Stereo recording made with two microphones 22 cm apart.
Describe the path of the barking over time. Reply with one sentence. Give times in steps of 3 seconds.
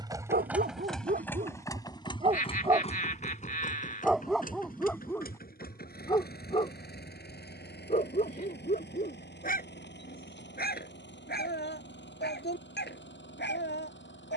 You can hear the barking on the right from 0 s, in the centre from 3 s and on the left from 6 s.